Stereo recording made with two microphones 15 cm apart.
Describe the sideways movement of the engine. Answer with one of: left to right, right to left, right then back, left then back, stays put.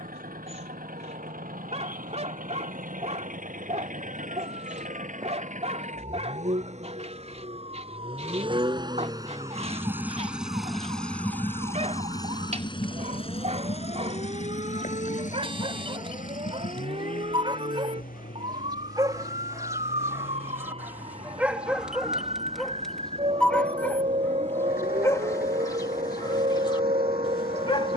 right to left.